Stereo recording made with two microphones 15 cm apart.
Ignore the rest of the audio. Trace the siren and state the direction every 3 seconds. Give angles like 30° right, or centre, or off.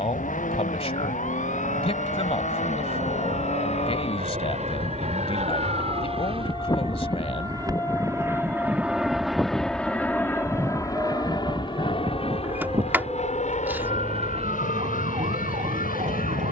60° left, 40° left, 20° left, 10° right, 40° right, 50° right.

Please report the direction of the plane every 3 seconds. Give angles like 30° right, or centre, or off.
70° right, 60° right, 30° right, 20° left, 40° left, 60° left.